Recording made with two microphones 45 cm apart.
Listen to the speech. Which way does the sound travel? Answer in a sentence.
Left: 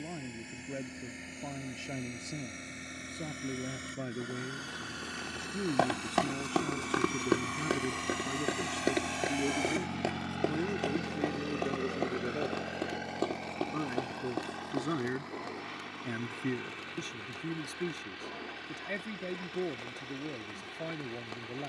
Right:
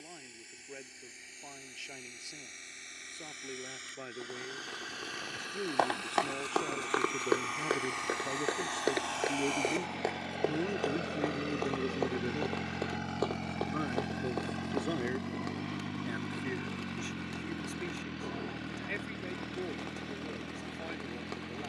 In this clip you hear the speech move from left to right and back again.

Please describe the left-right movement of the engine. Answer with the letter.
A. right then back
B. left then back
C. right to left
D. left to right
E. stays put
D.